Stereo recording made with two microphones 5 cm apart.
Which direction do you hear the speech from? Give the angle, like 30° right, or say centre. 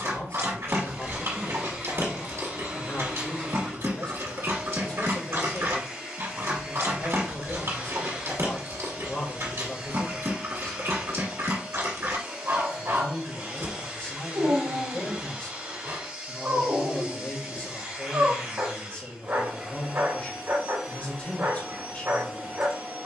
30° left.